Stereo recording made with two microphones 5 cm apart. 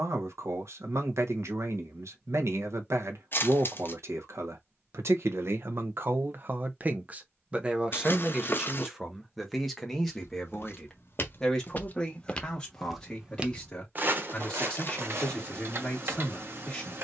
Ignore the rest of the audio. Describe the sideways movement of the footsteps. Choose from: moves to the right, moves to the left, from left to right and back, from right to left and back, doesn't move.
moves to the right.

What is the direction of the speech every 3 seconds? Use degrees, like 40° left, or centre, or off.
70° right, 60° right, 20° right, 10° left, 20° left, 20° left.